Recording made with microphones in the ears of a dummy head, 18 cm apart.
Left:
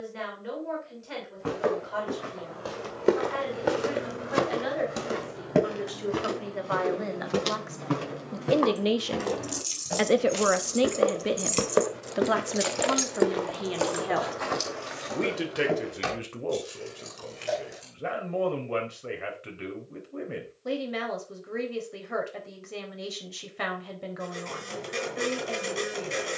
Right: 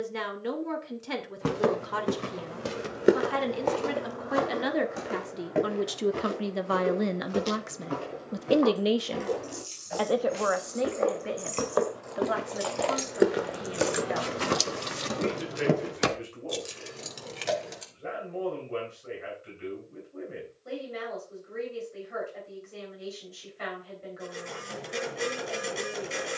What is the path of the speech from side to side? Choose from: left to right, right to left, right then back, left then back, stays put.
right to left.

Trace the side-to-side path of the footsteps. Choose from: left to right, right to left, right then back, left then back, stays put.
left then back.